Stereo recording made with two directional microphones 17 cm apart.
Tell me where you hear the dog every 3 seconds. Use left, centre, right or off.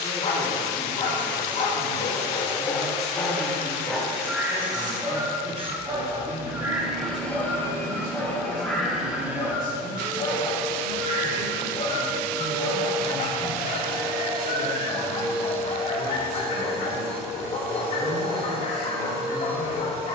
left, centre, centre, left, left, left, left.